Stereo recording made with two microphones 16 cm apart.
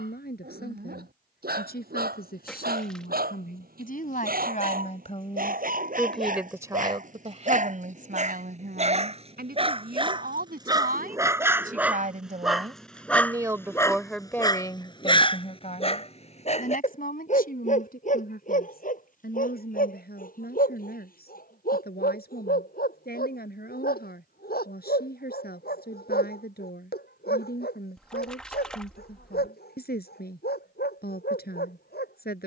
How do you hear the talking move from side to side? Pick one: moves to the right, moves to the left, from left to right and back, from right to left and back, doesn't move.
from left to right and back.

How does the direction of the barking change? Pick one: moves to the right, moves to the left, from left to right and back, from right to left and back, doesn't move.
moves to the left.